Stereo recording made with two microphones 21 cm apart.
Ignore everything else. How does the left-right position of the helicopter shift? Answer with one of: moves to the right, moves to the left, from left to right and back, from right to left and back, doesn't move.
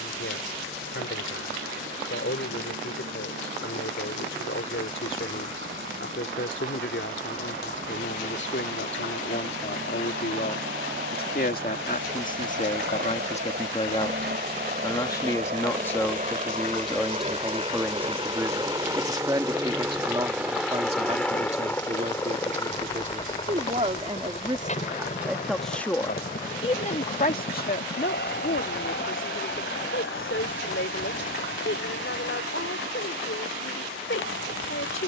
moves to the left.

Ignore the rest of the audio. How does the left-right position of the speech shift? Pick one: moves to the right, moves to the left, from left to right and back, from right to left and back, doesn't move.
from left to right and back.